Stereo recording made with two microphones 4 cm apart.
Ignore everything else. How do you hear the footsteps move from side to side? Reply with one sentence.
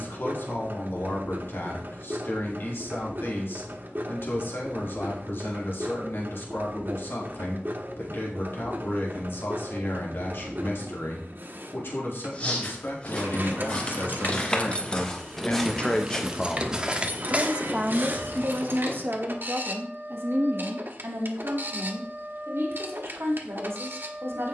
In this clip you hear the footsteps move from left to right.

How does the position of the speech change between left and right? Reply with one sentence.
In this clip you hear the speech move from left to right.